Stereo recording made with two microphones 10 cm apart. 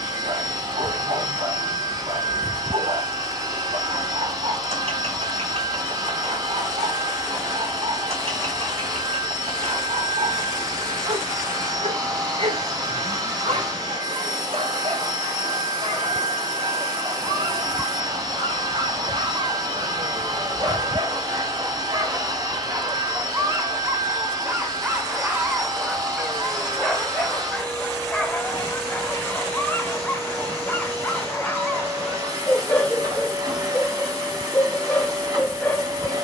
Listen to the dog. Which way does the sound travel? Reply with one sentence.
You can hear the dog move to the left.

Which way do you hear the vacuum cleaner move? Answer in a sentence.
You can hear the vacuum cleaner stay in one place.